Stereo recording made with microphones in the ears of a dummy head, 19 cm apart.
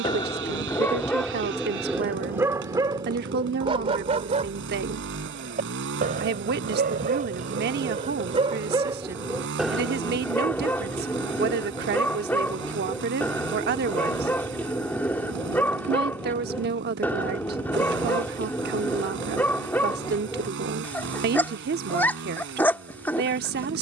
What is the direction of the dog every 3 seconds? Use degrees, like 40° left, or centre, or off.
centre, 30° right, 30° right, 10° left, 10° left, 10° left, 10° left, 10° left.